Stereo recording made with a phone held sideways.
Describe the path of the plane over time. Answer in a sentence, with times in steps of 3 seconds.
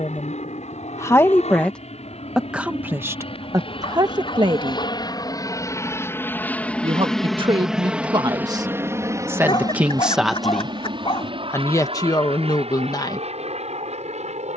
In this clip you hear the plane on the left from 0 s, in the centre from 6 s and on the right from 9 s.